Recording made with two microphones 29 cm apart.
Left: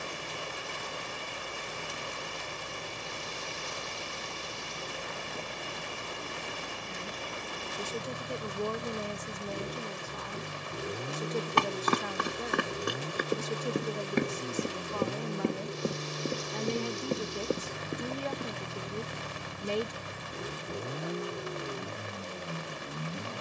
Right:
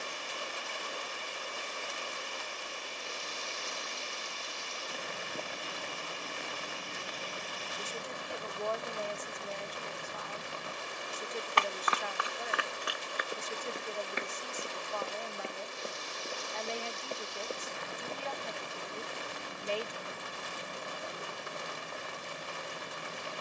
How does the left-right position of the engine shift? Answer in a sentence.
You can hear the engine stay put.